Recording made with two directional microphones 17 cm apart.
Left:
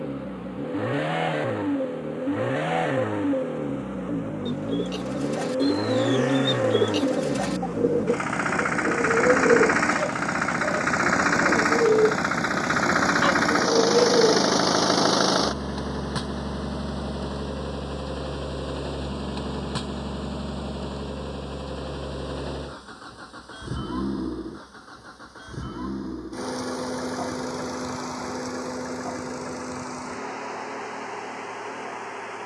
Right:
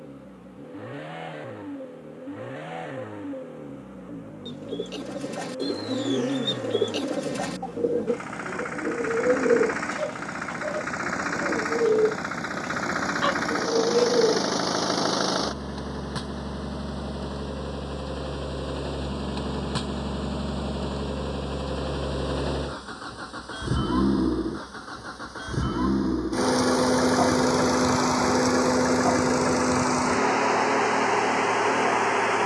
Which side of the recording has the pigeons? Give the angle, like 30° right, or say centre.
10° left.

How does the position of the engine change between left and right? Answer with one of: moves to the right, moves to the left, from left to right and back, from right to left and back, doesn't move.
moves to the right.